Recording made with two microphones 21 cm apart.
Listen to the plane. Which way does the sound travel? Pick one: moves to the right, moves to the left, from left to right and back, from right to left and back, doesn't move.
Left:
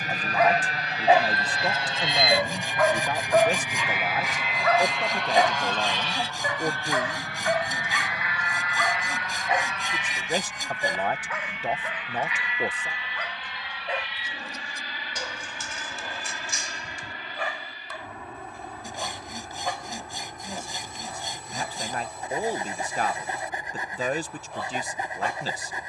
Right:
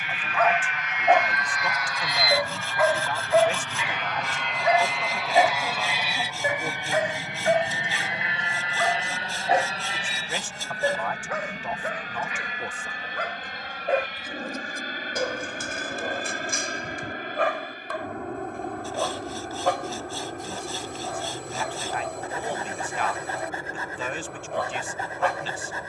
moves to the right.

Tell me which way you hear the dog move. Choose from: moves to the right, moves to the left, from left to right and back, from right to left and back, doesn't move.
moves to the right.